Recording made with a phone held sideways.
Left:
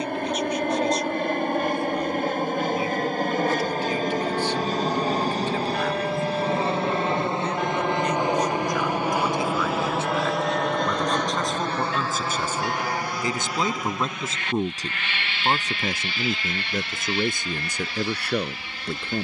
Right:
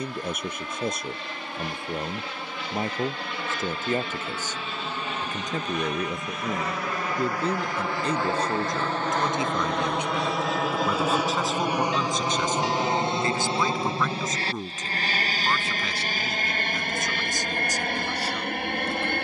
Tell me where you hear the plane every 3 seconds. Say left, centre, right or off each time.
left, left, left, centre, right, right, right.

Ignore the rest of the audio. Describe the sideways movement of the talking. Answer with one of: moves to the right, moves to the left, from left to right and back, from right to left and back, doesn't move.
moves to the left.